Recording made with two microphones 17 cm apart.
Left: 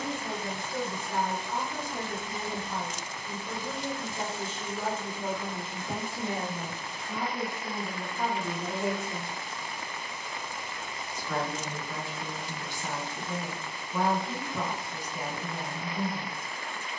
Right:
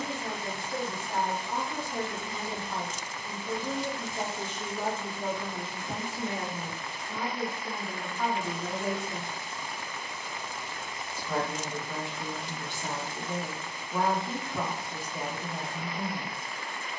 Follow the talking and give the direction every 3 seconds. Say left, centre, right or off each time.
right, centre, left, centre, right, right.